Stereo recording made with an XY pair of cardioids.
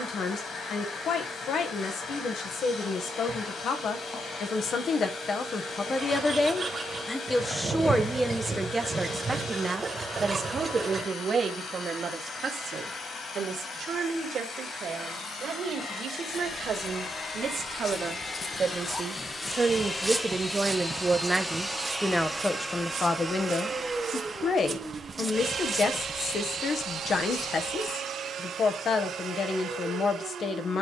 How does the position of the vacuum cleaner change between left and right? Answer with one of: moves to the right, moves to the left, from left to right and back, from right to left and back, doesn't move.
moves to the right.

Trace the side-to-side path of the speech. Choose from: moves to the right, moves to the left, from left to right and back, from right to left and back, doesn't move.
from left to right and back.